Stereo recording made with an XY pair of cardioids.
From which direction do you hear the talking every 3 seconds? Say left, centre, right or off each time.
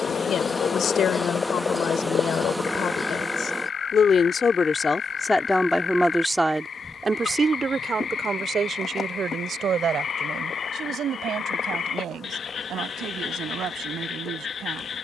left, left, right, right, right.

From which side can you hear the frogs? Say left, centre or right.
left.